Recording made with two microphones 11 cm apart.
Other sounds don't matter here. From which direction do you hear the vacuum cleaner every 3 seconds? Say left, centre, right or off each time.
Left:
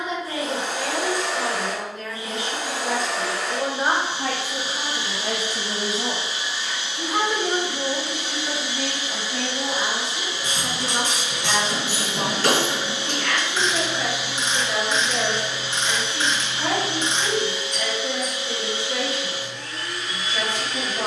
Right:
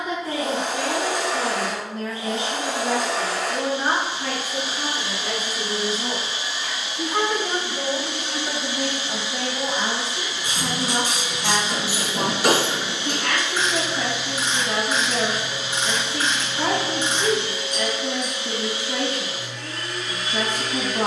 right, right, right, left, left, right, right.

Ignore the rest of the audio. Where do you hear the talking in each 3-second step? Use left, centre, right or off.
right, left, centre, right, right, right, right.